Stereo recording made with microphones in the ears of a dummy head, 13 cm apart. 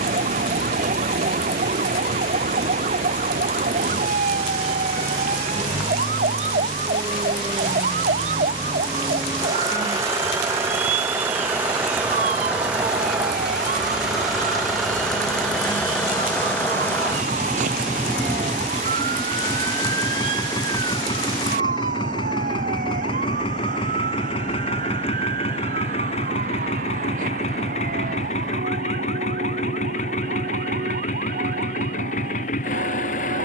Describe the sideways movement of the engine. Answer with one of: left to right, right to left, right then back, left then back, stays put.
right to left.